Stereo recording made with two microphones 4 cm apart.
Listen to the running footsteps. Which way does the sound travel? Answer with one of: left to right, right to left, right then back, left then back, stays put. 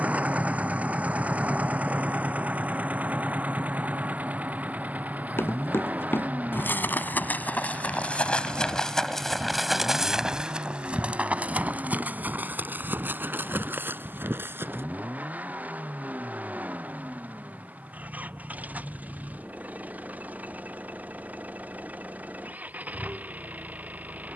left to right.